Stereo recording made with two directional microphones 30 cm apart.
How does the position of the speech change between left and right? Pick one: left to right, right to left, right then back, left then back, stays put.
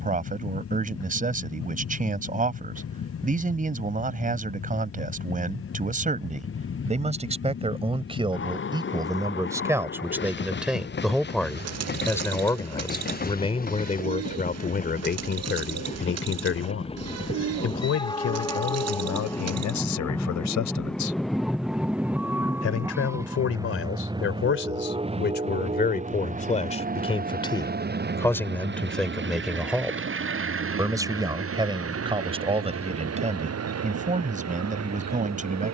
left then back.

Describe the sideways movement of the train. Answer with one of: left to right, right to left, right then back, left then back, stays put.
left to right.